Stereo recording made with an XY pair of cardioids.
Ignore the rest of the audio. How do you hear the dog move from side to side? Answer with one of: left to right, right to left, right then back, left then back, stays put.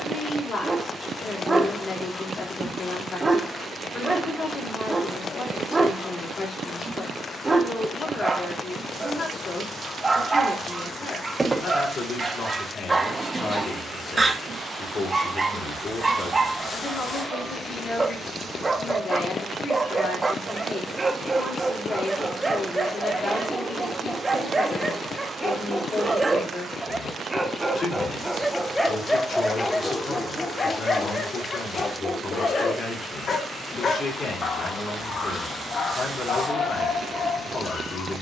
right to left.